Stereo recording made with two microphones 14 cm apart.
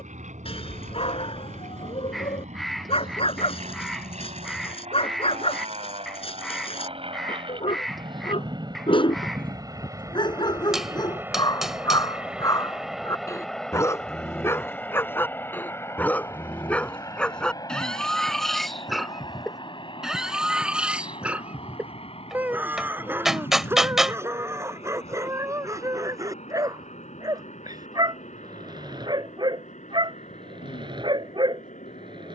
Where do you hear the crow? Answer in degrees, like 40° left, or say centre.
centre.